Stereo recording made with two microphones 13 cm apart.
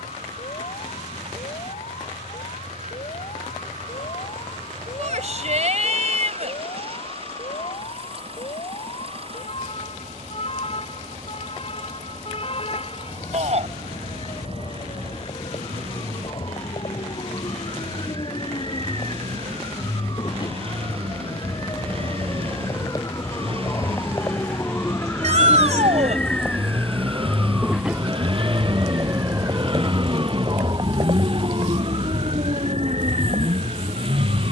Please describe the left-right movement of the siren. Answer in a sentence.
In this clip you hear the siren move from left to right.